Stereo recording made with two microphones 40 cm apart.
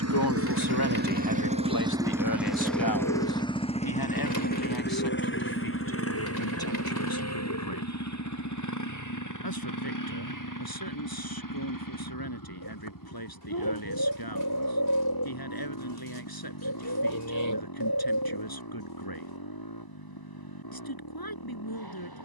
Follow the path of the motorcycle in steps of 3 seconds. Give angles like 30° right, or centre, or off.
20° right, 20° left, 40° left, 50° left, 50° left, 60° left, 60° left, 60° left.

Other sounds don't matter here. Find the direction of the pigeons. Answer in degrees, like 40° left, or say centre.
50° left.